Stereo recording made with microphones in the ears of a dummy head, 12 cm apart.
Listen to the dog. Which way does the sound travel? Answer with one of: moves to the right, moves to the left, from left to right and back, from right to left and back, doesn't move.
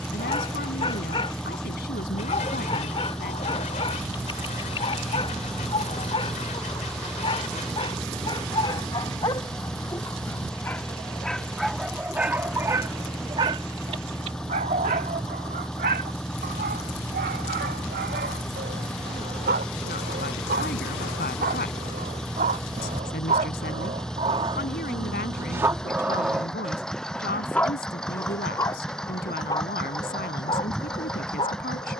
from left to right and back.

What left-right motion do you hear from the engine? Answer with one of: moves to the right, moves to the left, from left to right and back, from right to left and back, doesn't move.
doesn't move.